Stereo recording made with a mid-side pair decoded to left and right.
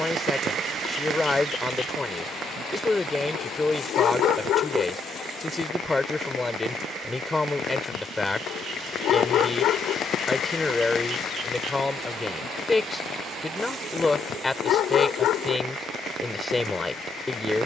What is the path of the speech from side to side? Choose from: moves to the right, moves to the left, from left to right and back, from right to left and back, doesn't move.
doesn't move.